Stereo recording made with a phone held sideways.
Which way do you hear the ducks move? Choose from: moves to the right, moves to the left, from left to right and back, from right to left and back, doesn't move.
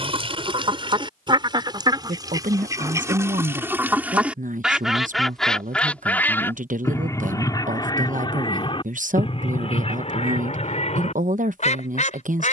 moves to the left.